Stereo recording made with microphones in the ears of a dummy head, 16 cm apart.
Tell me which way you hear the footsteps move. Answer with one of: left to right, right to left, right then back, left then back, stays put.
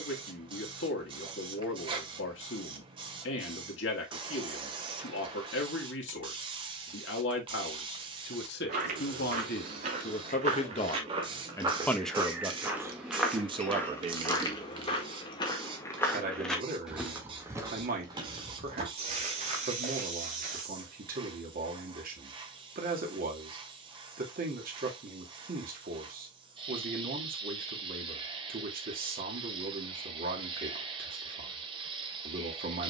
left then back.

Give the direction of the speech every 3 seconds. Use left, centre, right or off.
left, left, left, left, right, right, right, right, right, right, right.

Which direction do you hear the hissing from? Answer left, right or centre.
right.